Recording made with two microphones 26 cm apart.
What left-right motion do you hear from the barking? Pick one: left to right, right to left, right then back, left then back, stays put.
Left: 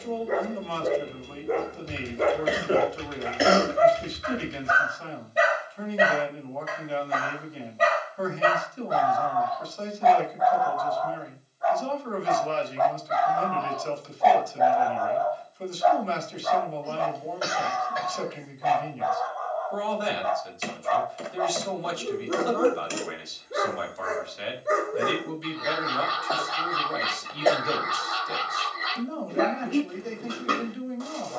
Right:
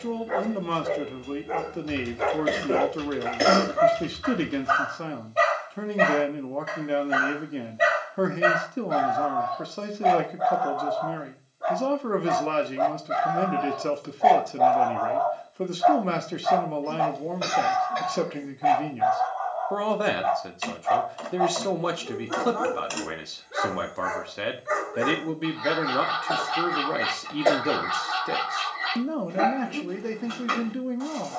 right then back.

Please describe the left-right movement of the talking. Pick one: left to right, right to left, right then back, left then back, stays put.
stays put.